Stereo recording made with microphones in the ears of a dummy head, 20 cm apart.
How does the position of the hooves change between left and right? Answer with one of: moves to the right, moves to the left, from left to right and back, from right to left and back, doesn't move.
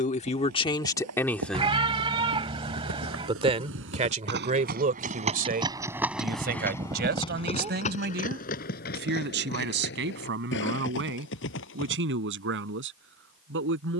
moves to the left.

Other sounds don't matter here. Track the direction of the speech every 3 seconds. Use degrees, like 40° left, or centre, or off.
20° left, 30° right, 50° right, 60° right, 60° right.